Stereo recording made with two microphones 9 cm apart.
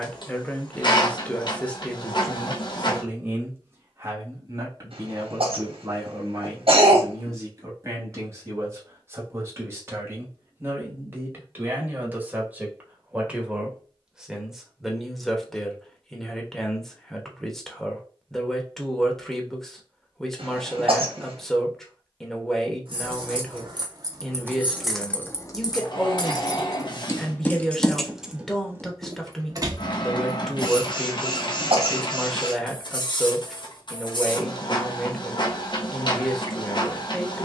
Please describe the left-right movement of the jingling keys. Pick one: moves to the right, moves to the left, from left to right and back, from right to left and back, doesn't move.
from right to left and back.